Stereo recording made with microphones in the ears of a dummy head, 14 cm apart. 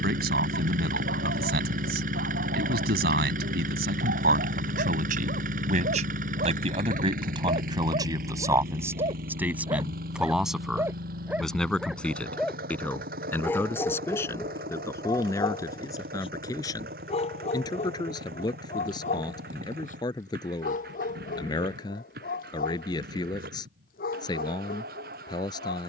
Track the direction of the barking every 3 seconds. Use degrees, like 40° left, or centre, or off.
70° right, 60° right, 40° right, 20° right, 20° left, 40° left, 50° left, 60° left, 60° left.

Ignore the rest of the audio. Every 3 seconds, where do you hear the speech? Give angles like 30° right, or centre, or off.
70° right, 60° right, 30° right, centre, 10° left, 20° left, 30° left, 30° left, 30° left.